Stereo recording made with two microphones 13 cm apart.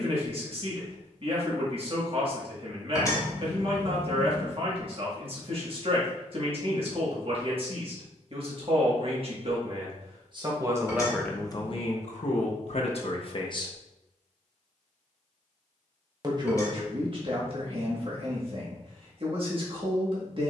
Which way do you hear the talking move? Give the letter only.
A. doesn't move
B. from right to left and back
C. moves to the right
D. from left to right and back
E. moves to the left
B.